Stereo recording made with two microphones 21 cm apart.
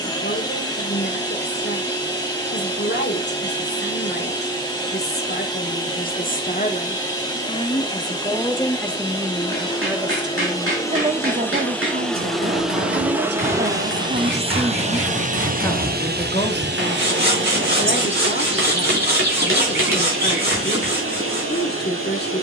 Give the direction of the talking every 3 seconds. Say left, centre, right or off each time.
left, left, left, right, right, left, left, left.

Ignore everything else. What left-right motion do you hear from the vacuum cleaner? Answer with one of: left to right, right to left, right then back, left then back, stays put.
left to right.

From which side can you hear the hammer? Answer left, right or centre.
right.